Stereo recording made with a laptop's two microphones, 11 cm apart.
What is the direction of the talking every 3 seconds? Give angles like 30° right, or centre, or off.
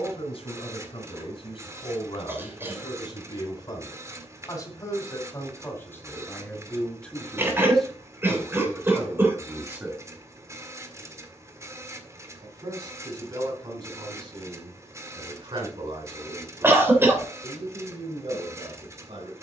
50° left, 30° left, 10° left, 10° right, 40° right, 50° right, 60° right.